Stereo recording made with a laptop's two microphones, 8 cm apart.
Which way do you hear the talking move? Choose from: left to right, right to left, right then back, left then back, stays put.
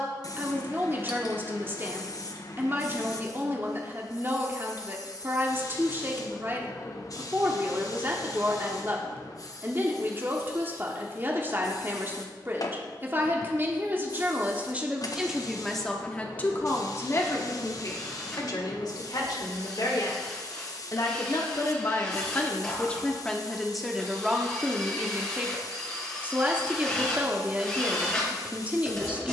left then back.